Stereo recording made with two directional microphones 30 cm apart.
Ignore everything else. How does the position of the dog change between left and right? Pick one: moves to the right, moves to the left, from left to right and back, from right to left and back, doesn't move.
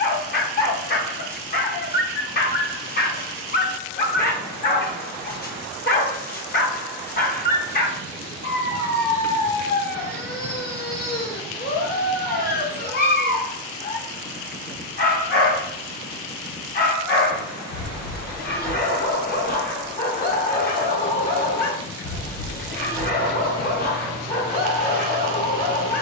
doesn't move.